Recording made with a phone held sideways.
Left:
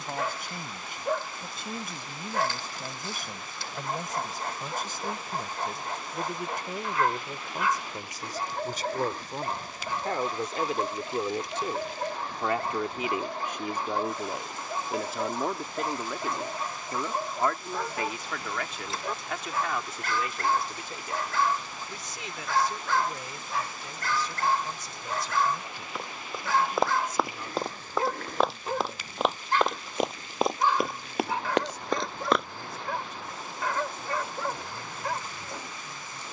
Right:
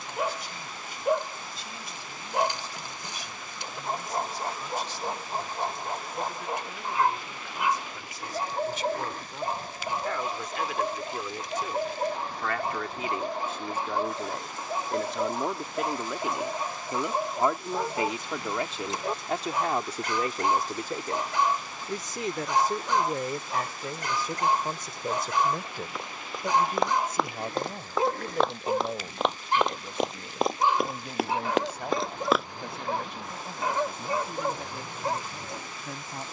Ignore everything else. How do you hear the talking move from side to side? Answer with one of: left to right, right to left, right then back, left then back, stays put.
left to right.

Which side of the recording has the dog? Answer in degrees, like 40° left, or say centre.
20° right.